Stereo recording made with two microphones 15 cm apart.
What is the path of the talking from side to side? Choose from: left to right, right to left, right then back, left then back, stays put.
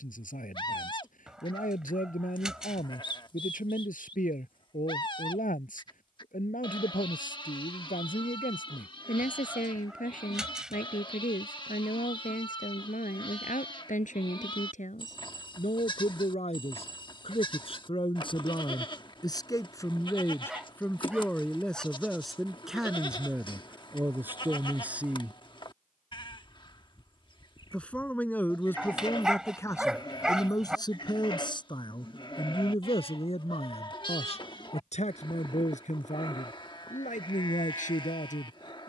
right then back.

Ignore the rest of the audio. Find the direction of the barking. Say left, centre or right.
centre.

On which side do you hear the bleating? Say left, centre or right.
left.